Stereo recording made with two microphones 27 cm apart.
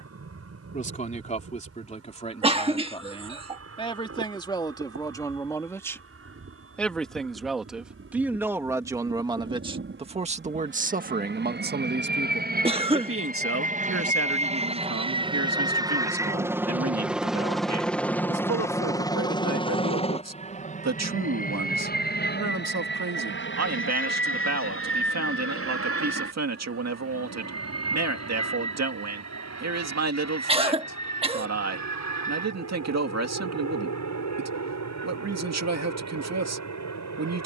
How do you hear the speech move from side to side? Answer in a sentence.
In this clip you hear the speech travel towards the right.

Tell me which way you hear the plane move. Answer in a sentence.
In this clip you hear the plane move from right to left.